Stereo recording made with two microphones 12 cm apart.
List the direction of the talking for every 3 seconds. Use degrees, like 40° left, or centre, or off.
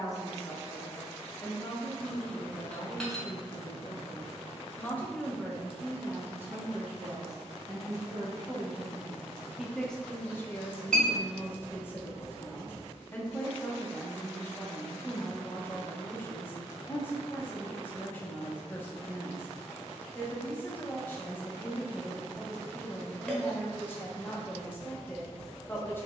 30° left, 20° left, 30° right, 10° left, 20° left, 20° left, 20° left, 20° left, 20° left.